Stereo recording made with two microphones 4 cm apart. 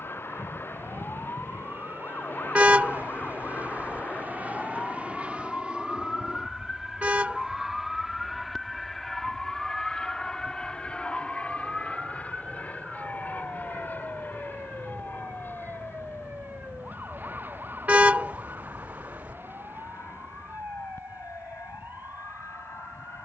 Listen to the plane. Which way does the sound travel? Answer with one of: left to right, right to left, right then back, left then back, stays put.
right to left.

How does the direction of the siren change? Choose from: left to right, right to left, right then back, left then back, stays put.
left to right.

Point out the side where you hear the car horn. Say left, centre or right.
right.